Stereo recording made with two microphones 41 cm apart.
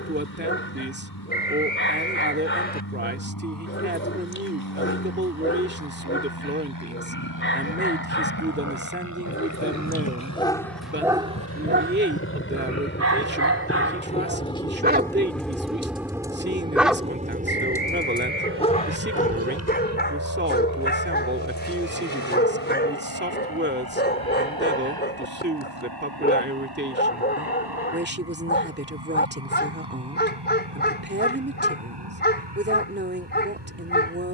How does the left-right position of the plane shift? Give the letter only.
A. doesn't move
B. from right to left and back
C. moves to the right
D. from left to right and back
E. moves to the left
C.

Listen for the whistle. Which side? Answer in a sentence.
You can hear the whistle on the left.